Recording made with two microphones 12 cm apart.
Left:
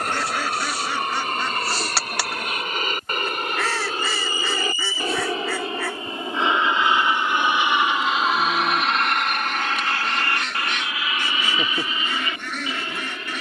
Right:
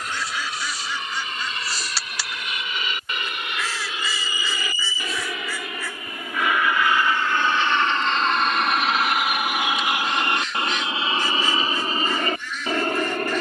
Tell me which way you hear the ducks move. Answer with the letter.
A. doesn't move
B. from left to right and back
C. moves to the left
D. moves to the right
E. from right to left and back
A.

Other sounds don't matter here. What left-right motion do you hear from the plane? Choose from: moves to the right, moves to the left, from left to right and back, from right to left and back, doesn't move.
moves to the right.